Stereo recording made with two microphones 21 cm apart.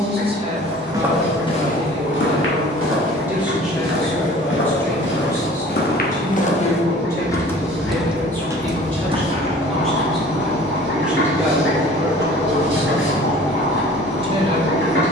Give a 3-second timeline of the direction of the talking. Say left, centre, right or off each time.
right, centre, centre, centre, right.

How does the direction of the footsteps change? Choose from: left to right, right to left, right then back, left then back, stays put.
left then back.